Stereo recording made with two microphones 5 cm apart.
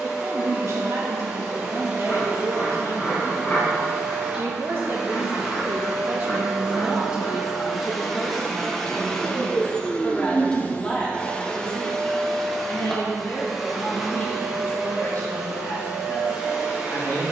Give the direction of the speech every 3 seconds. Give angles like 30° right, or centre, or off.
70° right, 50° right, 10° right, 10° left, 30° left, 30° left.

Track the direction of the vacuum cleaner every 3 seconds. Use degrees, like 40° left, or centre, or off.
20° right, 10° right, centre, 20° left, centre, 10° right.